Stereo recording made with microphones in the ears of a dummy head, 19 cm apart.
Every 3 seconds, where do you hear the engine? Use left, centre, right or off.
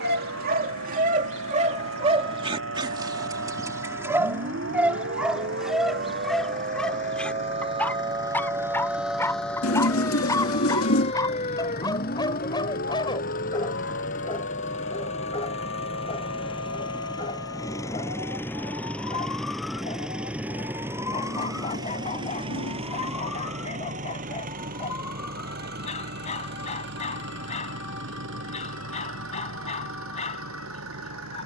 left, left, left, left, left, left, centre, right, right, right, right.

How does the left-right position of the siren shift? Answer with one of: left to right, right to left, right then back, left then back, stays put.
right to left.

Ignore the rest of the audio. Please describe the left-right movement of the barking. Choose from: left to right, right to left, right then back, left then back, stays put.
right to left.